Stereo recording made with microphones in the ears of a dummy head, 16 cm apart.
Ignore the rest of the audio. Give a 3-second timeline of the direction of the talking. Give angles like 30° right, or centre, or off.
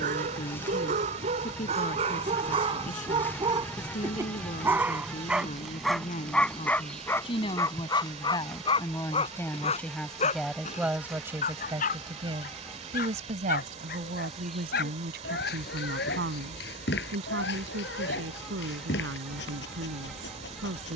50° left, 40° left, 30° left, centre, 50° right, 70° right, 80° right.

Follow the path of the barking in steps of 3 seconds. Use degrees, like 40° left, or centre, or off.
40° right, 10° right, 10° left, 40° left, 60° left, 60° left, 70° left.